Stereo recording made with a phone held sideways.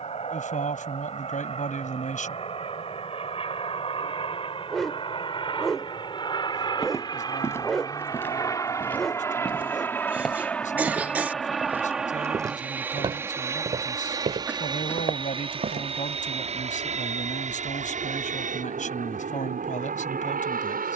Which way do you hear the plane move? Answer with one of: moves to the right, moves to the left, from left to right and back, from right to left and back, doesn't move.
moves to the right.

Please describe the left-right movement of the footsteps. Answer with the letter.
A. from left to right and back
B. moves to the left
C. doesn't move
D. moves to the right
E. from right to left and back
D.